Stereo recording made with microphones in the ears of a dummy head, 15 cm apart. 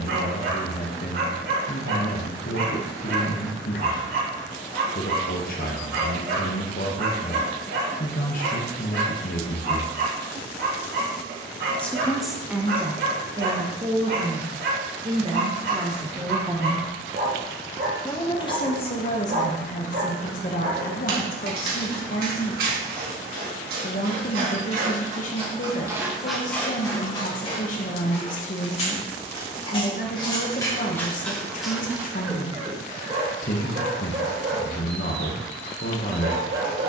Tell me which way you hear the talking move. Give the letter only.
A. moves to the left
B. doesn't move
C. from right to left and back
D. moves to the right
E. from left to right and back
E.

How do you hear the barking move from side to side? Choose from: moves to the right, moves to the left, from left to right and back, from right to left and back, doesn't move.
from right to left and back.